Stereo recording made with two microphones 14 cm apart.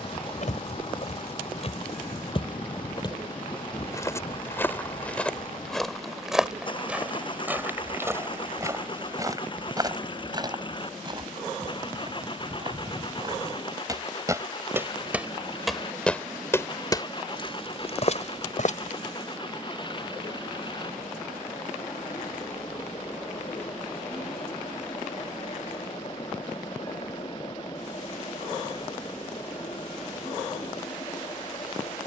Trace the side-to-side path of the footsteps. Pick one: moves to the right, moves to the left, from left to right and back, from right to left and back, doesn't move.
from left to right and back.